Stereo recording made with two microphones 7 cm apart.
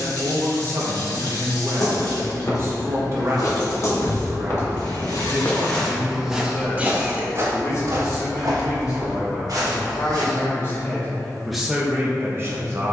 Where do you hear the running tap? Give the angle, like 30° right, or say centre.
80° left.